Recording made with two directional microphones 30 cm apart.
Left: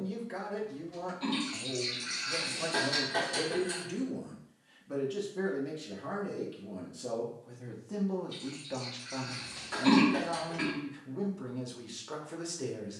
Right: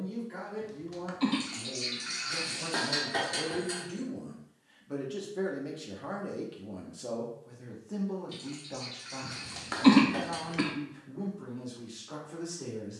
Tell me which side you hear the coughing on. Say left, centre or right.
right.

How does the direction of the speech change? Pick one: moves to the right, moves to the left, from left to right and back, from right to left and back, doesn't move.
from left to right and back.